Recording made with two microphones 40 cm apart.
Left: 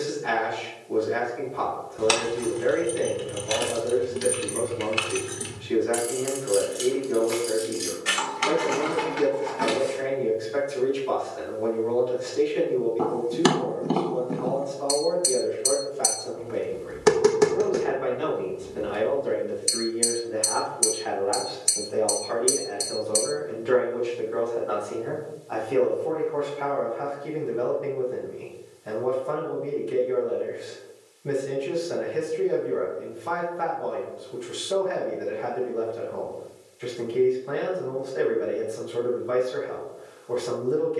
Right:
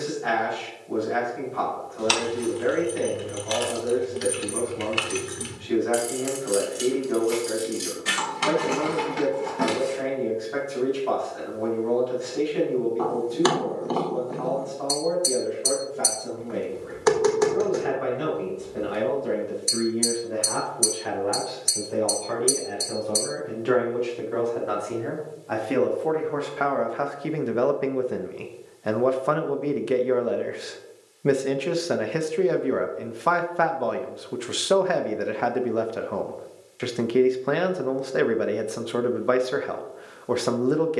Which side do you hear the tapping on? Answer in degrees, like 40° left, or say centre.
40° left.